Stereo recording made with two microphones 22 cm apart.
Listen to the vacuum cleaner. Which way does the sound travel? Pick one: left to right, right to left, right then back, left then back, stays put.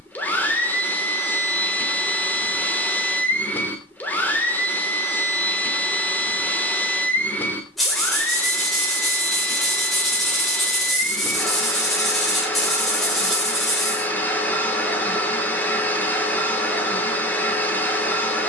stays put.